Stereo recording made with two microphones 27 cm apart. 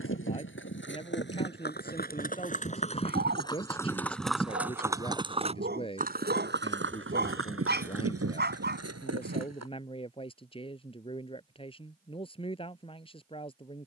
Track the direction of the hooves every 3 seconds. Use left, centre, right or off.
left, centre, right, right, off.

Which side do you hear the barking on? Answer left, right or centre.
right.